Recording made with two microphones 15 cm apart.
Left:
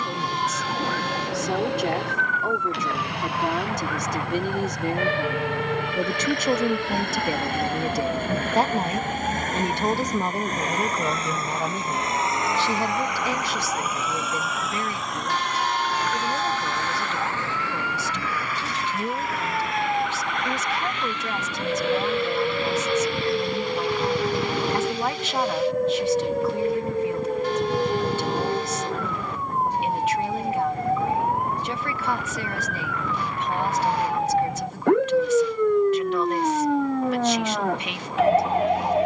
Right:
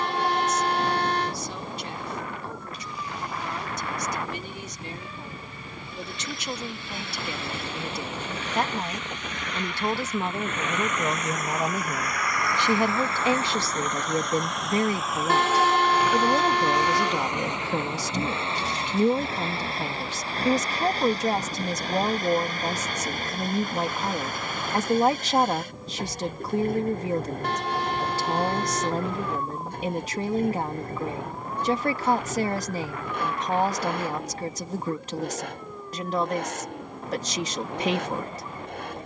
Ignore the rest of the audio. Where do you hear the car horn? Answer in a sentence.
In this clip you hear the car horn on the right.